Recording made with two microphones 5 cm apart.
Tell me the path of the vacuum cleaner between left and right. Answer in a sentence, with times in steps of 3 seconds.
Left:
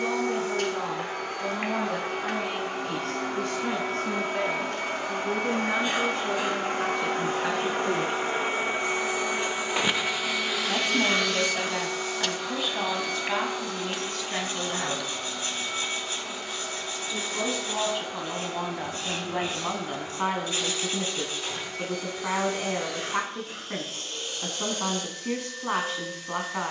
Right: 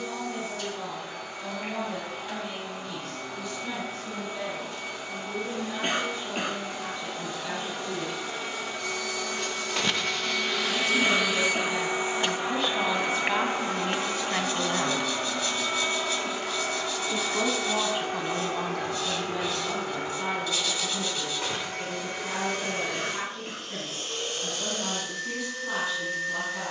You can hear the vacuum cleaner on the left from 0 s, in the centre from 9 s and on the right from 12 s.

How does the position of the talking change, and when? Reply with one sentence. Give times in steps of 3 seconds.
In this clip you hear the talking on the left from 0 s, in the centre from 12 s, on the right from 15 s and on the left from 18 s.